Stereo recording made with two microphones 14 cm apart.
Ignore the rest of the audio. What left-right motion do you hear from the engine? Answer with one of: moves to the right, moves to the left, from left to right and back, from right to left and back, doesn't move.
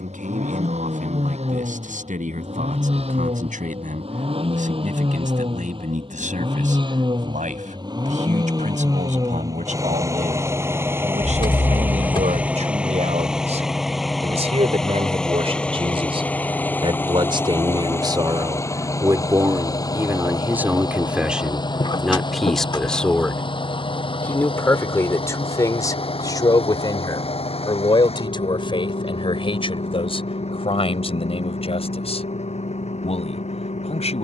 moves to the left.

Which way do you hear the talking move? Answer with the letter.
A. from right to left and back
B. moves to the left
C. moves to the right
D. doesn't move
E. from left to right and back
B.